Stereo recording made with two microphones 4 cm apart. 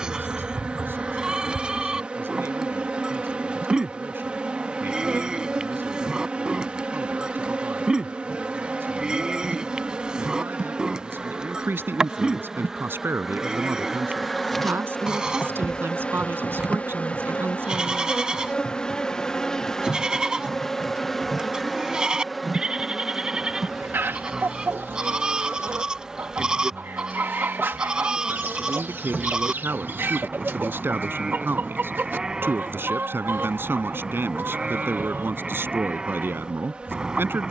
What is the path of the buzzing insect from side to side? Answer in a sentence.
In this clip you hear the buzzing insect move from right to left and back again.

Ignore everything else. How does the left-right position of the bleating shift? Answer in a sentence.
You can hear the bleating stay in one place.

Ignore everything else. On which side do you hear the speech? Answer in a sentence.
You can hear the speech on the right.